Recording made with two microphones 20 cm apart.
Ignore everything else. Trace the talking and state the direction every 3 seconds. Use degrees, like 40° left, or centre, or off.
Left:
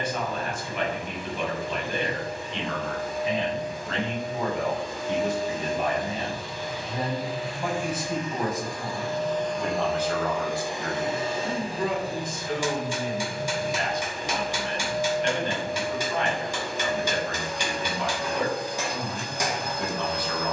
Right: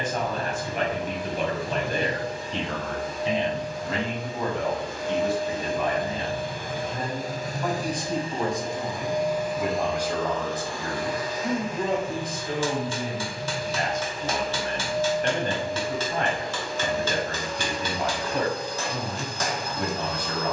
40° right, centre, 10° left, 20° right, 40° right, 50° right, 50° right.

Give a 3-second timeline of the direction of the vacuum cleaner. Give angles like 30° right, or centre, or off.
80° right, 70° right, 40° right, 10° left, 50° left, 50° left, 50° left.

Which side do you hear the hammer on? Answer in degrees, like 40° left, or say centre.
10° left.